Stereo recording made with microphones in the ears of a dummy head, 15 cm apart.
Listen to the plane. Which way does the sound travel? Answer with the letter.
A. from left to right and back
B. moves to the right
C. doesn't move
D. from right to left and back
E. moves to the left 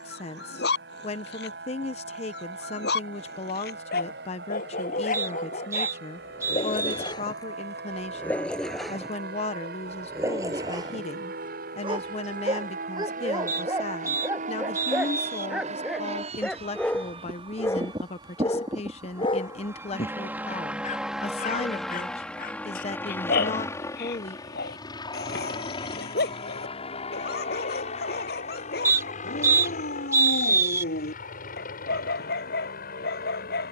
E.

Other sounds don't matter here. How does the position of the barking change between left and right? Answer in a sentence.
You can hear the barking move from left to right and back again.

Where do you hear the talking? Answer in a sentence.
You can hear the talking on the left.